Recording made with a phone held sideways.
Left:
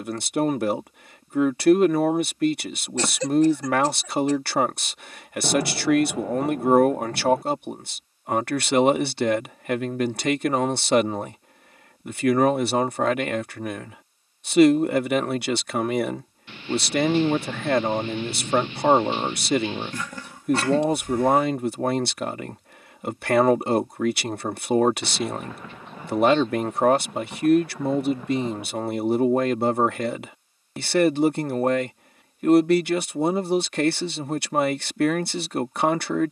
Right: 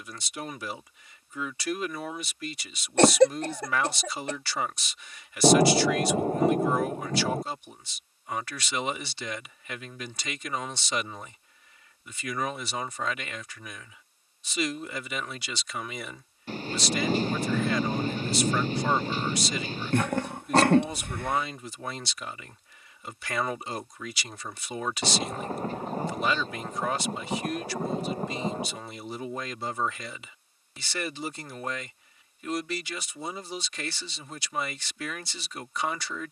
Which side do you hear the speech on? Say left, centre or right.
left.